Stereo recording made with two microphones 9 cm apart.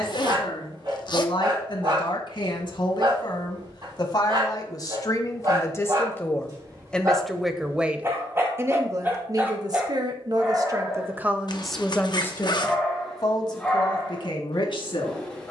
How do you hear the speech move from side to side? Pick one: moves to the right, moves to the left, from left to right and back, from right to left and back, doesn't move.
from left to right and back.